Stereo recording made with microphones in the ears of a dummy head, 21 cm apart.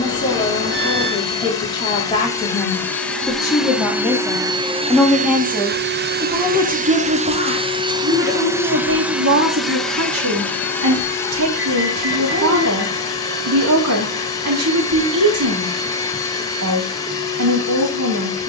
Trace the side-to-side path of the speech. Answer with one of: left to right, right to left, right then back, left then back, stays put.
left to right.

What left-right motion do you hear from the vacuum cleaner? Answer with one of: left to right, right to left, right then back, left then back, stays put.
right then back.